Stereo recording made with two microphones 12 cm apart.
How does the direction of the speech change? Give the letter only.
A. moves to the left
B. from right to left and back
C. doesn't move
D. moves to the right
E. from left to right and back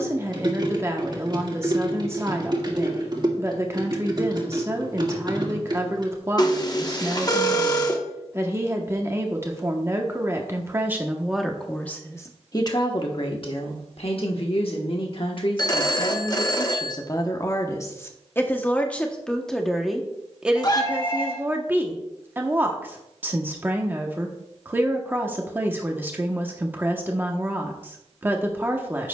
B.